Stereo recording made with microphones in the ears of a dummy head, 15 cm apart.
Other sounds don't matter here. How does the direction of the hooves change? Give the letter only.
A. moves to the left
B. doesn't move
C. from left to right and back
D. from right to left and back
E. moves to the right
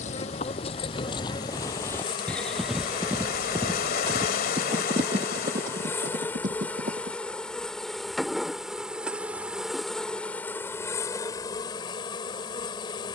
E.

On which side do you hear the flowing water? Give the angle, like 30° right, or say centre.
60° left.